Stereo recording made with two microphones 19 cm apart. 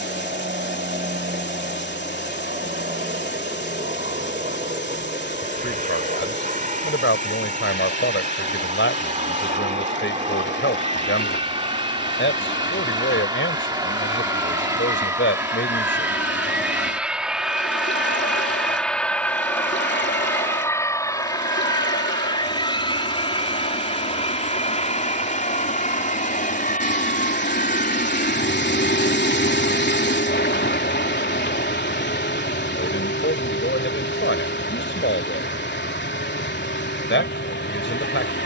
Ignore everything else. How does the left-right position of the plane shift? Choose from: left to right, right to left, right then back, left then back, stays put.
right to left.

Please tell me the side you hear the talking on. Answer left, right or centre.
left.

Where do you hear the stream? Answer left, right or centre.
left.